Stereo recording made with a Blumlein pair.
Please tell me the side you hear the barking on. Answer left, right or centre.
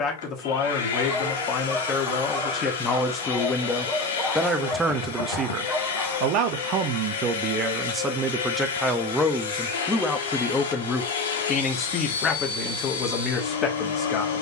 centre.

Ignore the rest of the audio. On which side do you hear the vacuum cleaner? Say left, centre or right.
left.